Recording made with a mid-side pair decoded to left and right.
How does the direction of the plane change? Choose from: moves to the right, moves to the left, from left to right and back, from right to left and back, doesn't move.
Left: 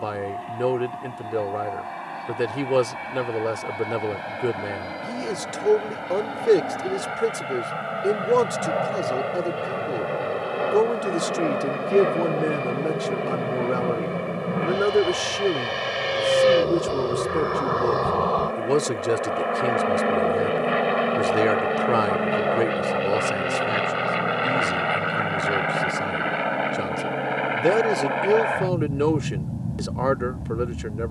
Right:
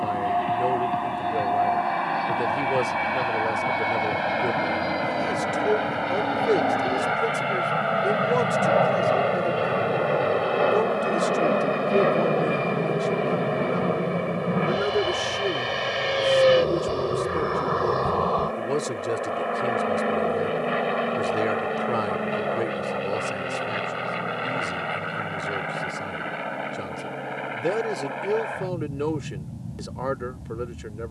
moves to the left.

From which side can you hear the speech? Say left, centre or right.
left.